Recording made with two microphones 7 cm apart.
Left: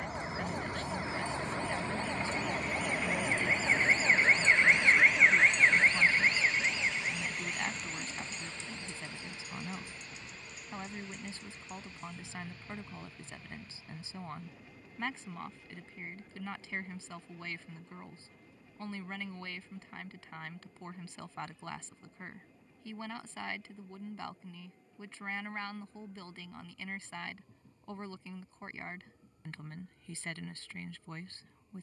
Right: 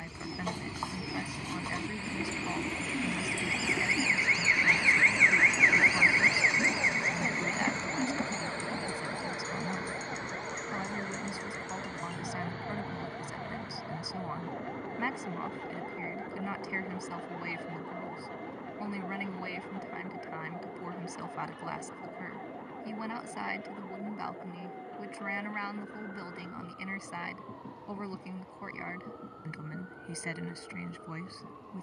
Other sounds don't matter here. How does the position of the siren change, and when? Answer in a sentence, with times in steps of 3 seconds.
In this clip you hear the siren on the left from 0 s and on the right from 6 s.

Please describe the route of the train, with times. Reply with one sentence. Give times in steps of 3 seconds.
In this clip you hear the train on the left from 0 s, in the centre from 3 s and on the right from 6 s.